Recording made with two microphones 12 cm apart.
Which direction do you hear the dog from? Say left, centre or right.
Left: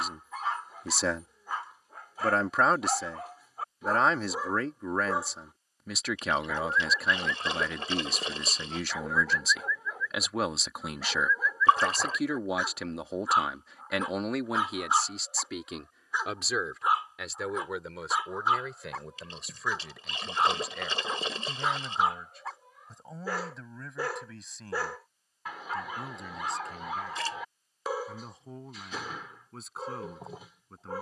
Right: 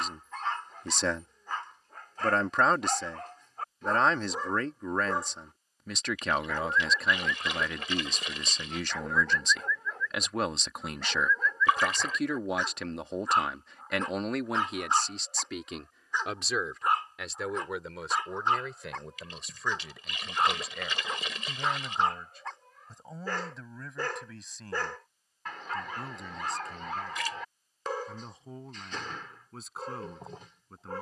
centre.